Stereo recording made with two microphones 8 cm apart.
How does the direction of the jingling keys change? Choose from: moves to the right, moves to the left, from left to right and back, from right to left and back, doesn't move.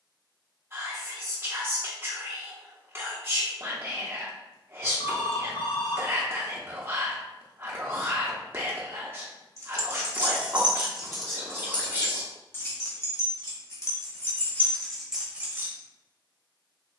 from right to left and back.